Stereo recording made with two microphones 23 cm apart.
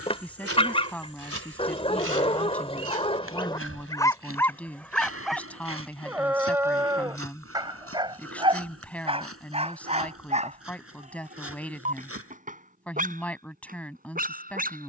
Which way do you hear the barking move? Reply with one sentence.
In this clip you hear the barking move from left to right.